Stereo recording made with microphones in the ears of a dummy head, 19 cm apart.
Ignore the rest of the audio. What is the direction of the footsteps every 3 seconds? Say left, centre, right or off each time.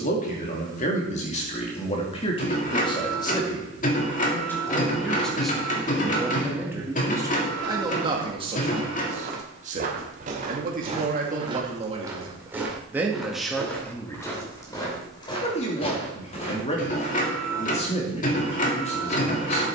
off, off, right, right, centre, left, off.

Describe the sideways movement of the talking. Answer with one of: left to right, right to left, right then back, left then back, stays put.
right then back.